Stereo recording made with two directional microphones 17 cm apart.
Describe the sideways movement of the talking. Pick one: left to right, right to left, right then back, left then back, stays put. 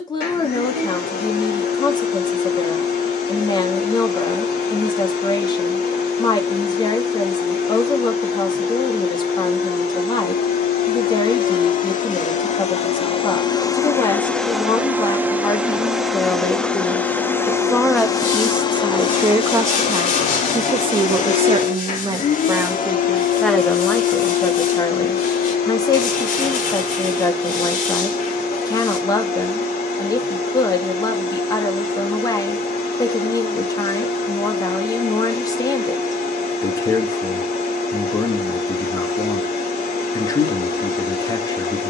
right then back.